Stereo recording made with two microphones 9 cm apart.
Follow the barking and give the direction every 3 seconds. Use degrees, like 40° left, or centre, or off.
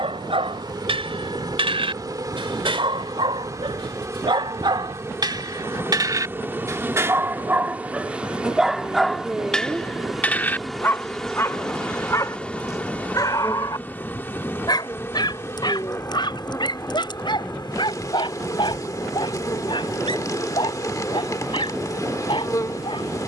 70° right, 60° right, 20° right, 20° left, 40° left, 50° left, 60° left, 60° left.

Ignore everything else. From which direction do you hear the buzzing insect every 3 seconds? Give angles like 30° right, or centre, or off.
40° right, 30° right, 20° right, centre, 20° left, 30° left, 40° left, 40° left.